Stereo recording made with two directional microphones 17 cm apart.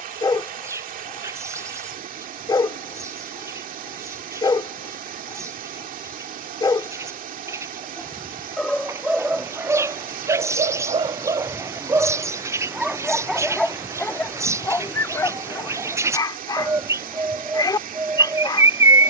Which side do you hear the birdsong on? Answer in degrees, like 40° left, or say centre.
20° right.